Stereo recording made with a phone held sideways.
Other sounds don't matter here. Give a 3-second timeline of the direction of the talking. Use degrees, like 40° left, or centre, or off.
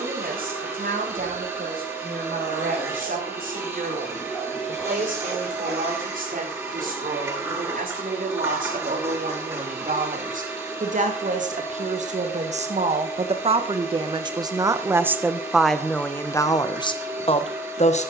70° right, 70° right, 70° right, 60° right, 40° right, 20° left.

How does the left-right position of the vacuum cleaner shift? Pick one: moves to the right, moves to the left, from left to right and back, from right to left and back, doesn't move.
doesn't move.